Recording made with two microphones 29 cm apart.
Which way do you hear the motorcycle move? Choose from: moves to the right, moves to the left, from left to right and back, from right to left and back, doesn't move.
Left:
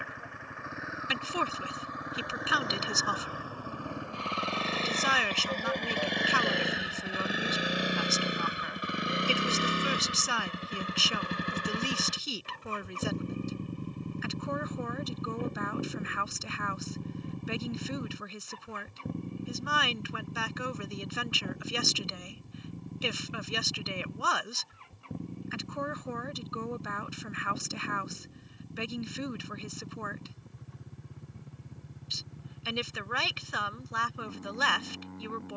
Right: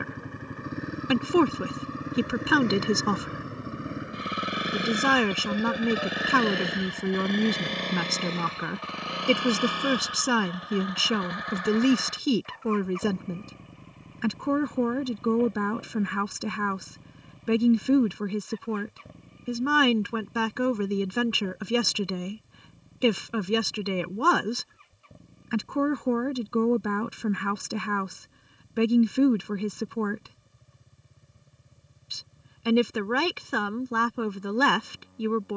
moves to the left.